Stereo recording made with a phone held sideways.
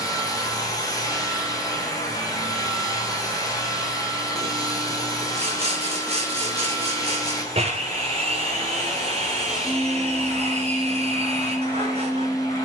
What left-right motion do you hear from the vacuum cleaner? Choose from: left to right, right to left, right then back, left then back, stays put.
stays put.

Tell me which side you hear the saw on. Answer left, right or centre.
right.